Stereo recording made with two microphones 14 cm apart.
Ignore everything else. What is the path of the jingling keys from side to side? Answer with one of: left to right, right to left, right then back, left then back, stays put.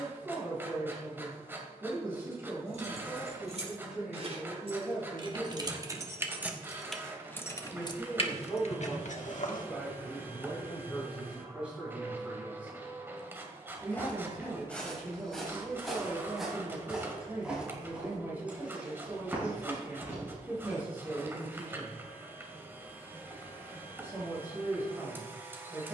right to left.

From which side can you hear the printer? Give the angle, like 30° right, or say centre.
10° right.